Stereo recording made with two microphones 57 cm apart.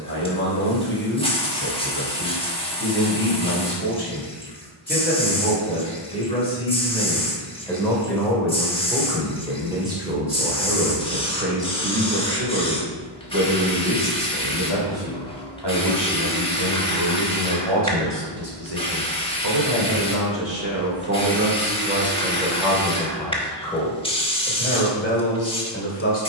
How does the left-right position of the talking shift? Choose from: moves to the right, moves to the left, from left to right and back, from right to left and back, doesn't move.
from left to right and back.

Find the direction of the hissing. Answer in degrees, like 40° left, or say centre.
10° left.